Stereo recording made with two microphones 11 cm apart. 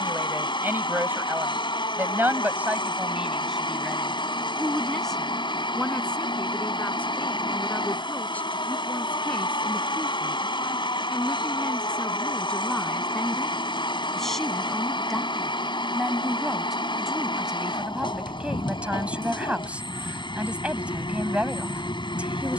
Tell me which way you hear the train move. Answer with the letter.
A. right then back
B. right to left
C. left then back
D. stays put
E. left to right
D.